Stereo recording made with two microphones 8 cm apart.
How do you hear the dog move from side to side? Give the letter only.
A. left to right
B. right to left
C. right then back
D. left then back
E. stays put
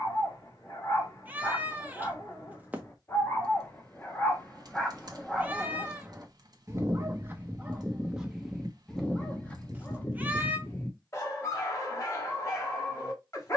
C.